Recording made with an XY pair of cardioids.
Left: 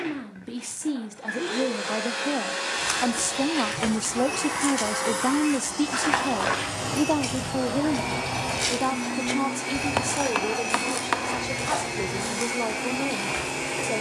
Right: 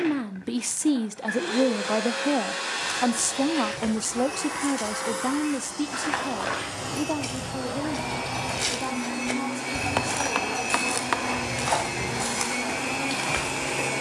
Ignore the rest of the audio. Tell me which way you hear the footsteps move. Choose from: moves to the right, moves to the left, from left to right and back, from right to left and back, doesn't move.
moves to the right.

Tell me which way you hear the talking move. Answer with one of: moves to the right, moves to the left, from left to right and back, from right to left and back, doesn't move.
moves to the left.